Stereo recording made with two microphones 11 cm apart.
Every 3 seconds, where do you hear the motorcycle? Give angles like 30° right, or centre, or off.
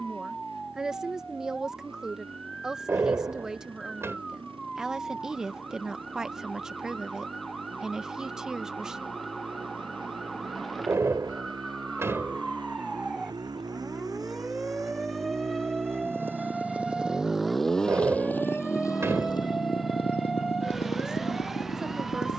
60° right, 50° right, 50° right, 50° right, 40° right, 10° right, 40° left, 70° left.